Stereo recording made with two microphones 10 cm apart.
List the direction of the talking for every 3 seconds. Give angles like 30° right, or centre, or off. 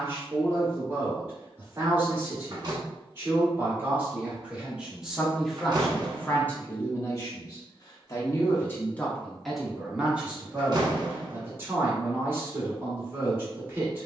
20° right, 10° right, 30° left, 10° right, 20° right.